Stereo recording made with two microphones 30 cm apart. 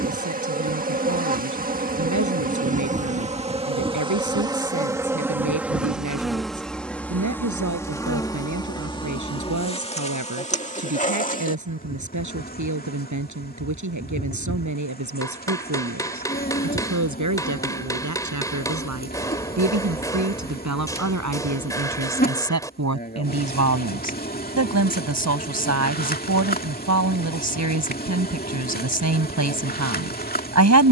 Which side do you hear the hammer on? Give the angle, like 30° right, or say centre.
10° left.